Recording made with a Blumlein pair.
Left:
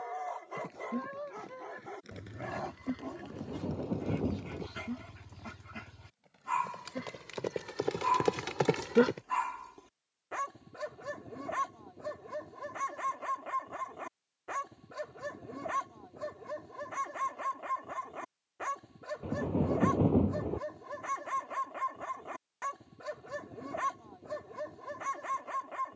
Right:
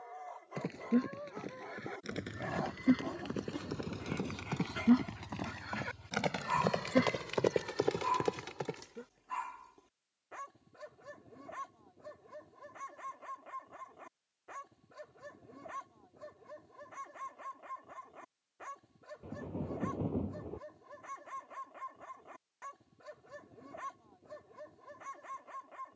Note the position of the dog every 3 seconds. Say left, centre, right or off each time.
centre, centre, centre, left, left, left, left, left, left.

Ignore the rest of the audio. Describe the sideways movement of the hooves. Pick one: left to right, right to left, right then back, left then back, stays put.
right to left.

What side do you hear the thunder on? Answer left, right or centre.
left.